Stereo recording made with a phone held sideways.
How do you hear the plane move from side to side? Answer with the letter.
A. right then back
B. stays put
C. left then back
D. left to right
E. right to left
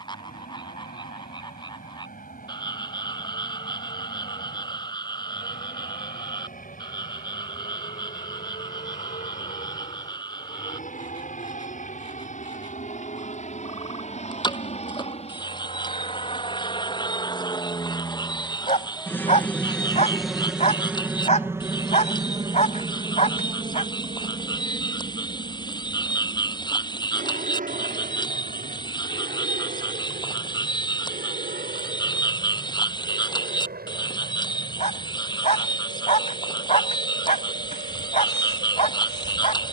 D.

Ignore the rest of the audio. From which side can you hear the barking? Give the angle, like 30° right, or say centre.
50° left.